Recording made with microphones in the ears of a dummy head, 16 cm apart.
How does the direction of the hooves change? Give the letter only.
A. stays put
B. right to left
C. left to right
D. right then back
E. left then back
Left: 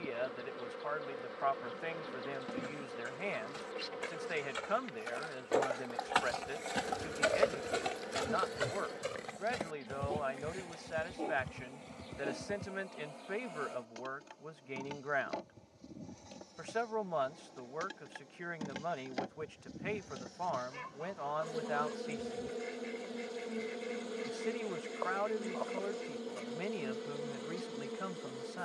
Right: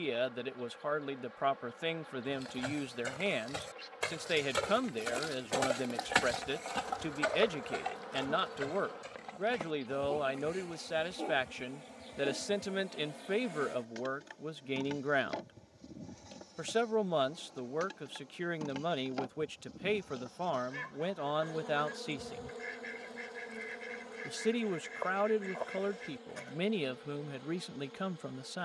B.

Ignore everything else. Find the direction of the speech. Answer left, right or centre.
right.